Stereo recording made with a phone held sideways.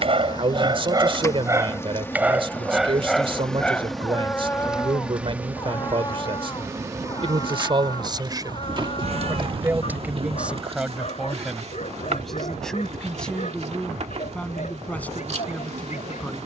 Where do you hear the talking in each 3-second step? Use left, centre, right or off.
right, right, right, centre, centre, centre.